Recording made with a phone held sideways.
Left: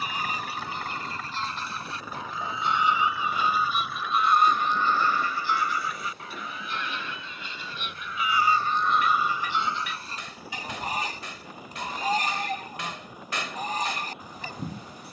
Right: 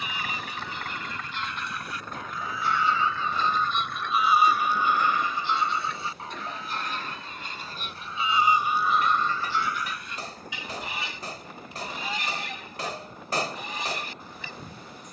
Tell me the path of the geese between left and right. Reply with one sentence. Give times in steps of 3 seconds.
You can hear the geese on the left from 0 s, in the centre from 3 s, on the right from 6 s and on the left from 9 s.